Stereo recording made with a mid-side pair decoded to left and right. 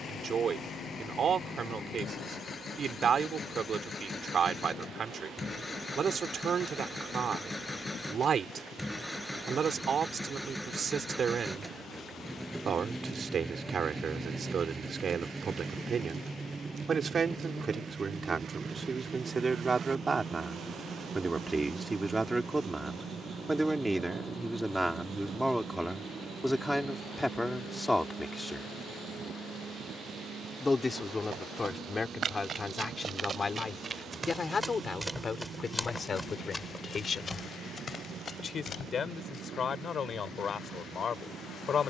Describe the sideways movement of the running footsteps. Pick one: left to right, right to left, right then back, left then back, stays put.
right to left.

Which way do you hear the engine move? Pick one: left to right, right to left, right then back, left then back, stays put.
left to right.